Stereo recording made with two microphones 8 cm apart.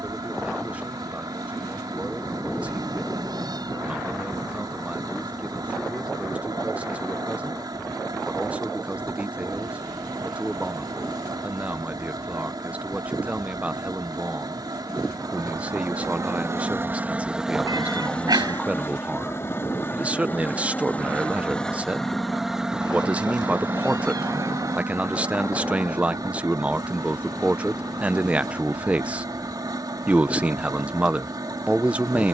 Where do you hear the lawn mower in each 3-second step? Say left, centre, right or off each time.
right, right, right, right, right, right, left, centre, right, right, right.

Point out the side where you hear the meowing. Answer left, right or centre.
right.